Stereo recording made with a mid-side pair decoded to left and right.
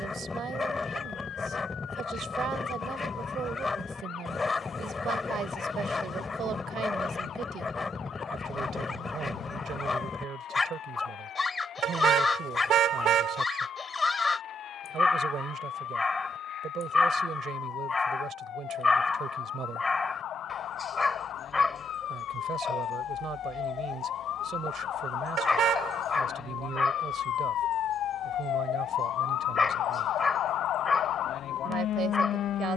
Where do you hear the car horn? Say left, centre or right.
right.